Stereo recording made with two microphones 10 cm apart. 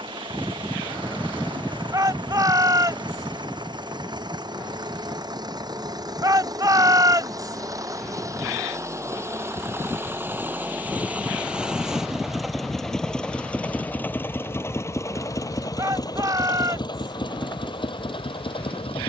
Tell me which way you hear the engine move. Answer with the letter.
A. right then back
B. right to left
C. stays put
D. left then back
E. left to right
B.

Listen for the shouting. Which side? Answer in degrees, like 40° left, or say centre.
40° right.